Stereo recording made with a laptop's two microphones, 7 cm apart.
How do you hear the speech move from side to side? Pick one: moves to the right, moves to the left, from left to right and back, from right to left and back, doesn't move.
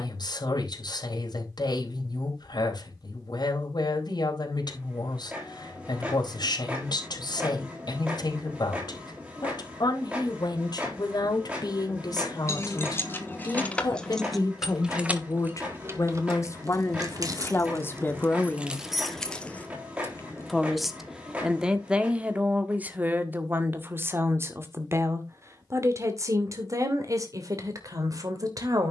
moves to the right.